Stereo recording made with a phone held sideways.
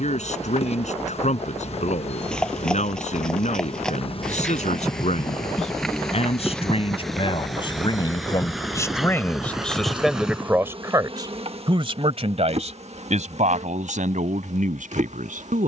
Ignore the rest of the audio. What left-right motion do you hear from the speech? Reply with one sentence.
You can hear the speech travel towards the right.